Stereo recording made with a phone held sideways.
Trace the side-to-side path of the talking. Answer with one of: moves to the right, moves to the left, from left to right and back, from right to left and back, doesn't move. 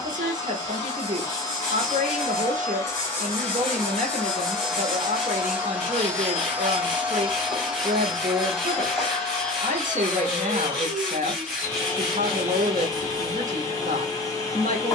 doesn't move.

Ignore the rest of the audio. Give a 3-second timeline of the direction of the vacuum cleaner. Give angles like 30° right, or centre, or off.
30° left, centre, 10° right, 10° left, 30° left.